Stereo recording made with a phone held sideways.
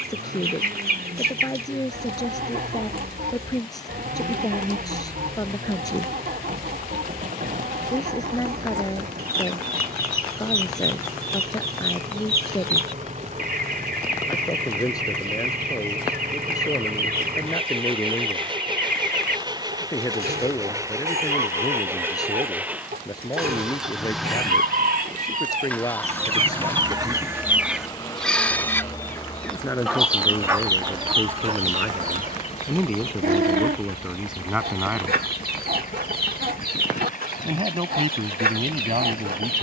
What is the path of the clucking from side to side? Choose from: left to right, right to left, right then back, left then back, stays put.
left then back.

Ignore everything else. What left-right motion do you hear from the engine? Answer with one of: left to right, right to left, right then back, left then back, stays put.
right to left.